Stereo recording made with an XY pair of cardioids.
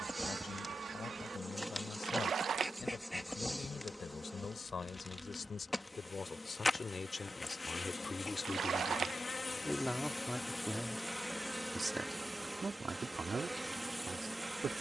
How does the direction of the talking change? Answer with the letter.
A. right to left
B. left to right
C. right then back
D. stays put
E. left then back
B.